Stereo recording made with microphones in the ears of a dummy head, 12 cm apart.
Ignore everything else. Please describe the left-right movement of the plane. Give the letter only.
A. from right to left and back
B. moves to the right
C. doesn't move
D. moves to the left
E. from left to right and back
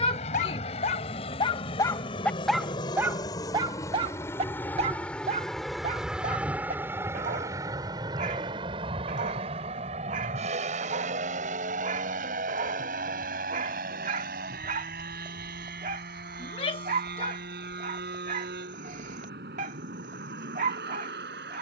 B.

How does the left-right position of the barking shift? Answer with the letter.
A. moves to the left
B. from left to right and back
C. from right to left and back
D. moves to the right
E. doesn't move
D.